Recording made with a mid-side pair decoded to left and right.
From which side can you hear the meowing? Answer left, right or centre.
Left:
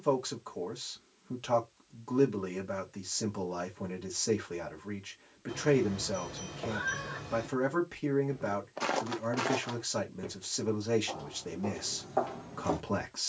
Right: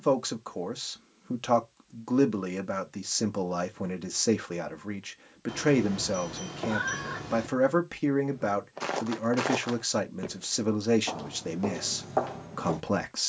right.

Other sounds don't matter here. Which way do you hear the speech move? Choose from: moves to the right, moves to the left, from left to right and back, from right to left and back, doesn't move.
doesn't move.